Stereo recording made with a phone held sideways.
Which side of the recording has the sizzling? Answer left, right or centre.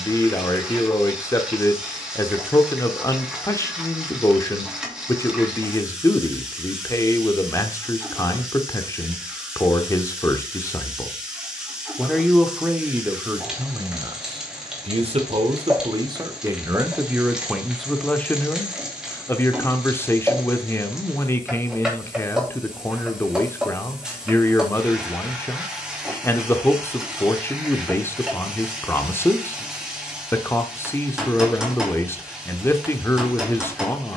centre.